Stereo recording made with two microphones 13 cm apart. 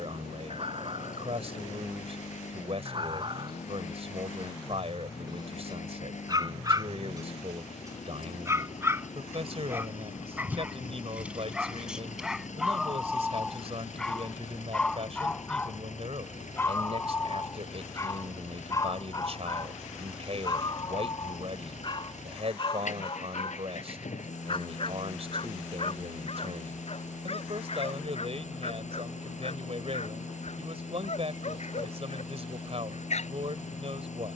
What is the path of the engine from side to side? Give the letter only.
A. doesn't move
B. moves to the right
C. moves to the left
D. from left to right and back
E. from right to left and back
A.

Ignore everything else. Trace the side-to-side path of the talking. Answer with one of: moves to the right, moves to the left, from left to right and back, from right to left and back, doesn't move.
doesn't move.